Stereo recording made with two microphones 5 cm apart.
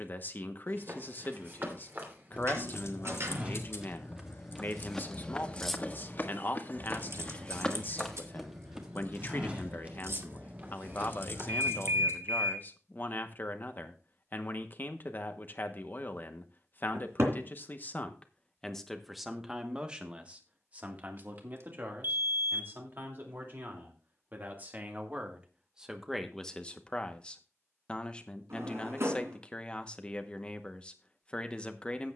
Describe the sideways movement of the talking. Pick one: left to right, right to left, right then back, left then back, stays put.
right then back.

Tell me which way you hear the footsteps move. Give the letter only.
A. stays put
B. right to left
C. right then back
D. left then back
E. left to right
D.